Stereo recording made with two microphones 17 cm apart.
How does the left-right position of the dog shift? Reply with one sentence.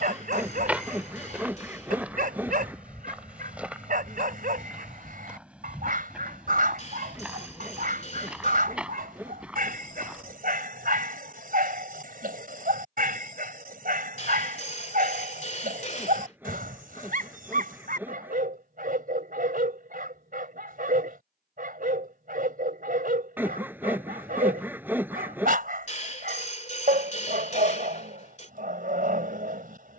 You can hear the dog stay in one place.